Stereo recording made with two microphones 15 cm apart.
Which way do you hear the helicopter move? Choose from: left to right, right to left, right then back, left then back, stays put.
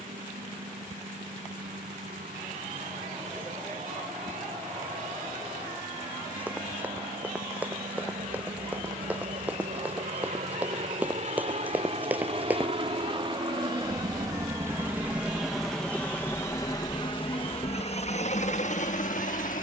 right to left.